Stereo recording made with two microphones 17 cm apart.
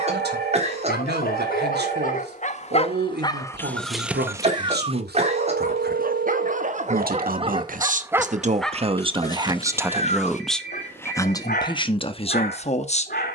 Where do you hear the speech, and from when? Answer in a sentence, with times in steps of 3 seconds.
You can hear the speech on the right from 0 s, in the centre from 9 s and on the left from 12 s.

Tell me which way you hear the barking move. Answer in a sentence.
In this clip you hear the barking move from left to right and back again.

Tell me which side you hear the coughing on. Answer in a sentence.
In this clip you hear the coughing on the right.